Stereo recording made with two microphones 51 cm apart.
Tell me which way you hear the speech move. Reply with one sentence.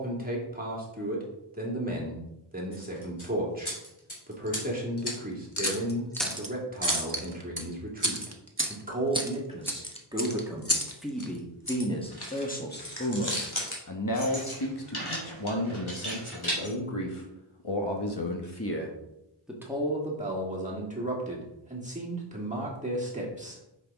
You can hear the speech go left and come back.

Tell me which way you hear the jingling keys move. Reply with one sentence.
In this clip you hear the jingling keys move from left to right and back again.